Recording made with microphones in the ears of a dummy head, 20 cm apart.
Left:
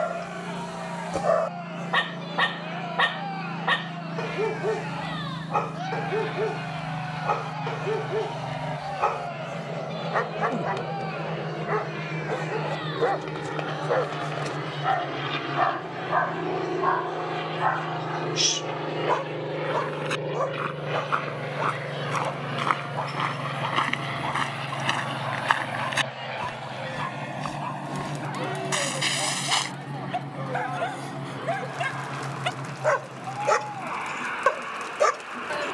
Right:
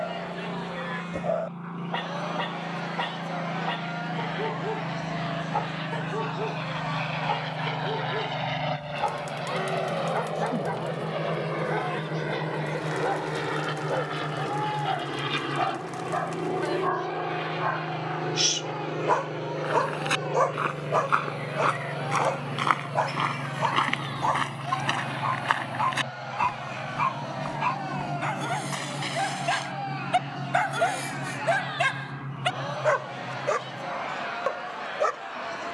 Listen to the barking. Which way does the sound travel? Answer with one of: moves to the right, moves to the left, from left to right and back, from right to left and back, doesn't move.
from left to right and back.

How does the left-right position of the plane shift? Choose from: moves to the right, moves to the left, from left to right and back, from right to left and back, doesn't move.
moves to the left.